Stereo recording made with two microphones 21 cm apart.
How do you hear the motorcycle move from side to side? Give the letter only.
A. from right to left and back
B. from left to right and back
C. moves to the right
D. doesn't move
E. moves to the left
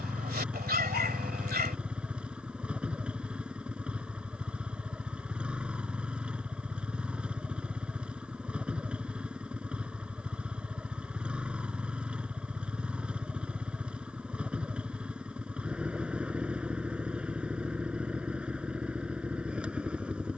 D.